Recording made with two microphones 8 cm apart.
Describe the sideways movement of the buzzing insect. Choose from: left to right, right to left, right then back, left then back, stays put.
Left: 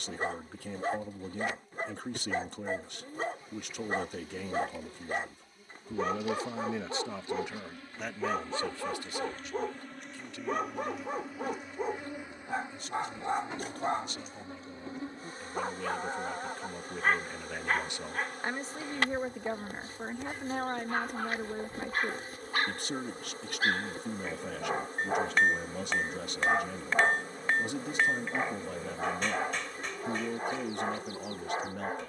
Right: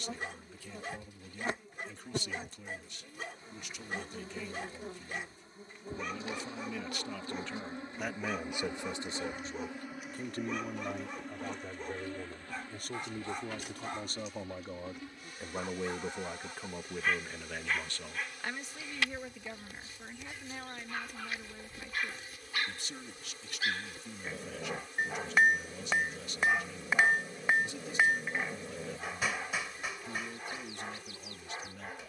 right to left.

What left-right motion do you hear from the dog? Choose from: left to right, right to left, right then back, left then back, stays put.
stays put.